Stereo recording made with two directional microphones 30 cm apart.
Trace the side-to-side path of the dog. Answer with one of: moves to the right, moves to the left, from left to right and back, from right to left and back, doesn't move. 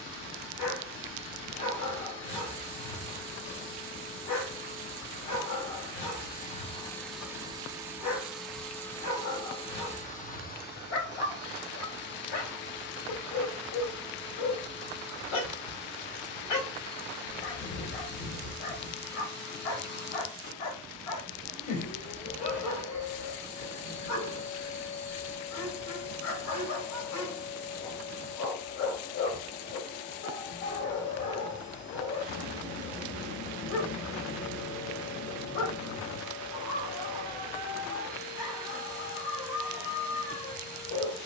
doesn't move.